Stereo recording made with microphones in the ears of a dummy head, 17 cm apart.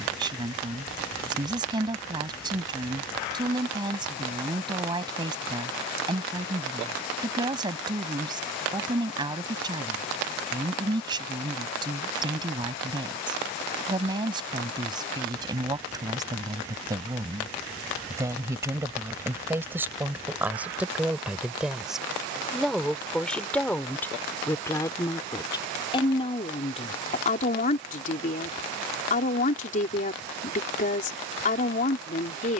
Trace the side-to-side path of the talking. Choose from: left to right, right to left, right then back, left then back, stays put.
right to left.